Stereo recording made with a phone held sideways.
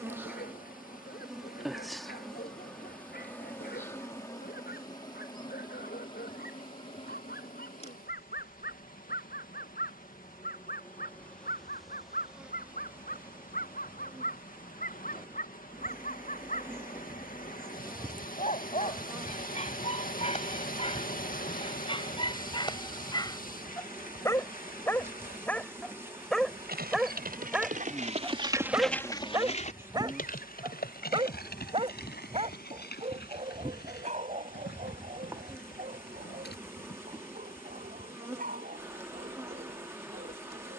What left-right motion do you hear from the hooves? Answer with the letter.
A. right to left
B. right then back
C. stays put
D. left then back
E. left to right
A.